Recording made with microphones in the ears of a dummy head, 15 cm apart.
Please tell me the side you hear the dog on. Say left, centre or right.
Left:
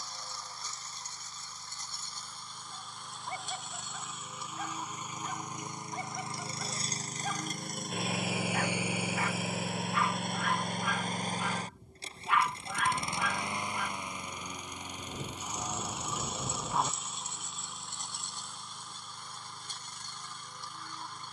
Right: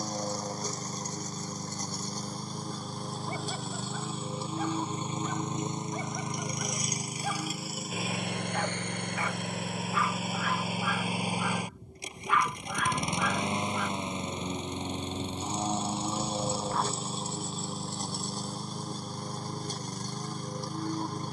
right.